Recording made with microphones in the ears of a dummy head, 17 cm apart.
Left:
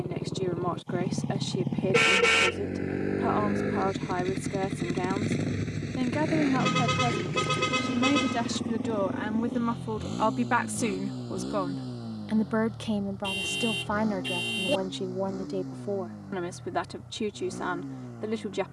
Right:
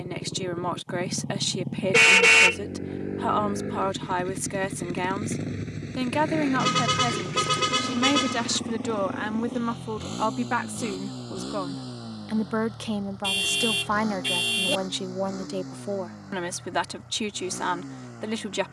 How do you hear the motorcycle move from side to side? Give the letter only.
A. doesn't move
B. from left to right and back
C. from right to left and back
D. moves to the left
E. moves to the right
E.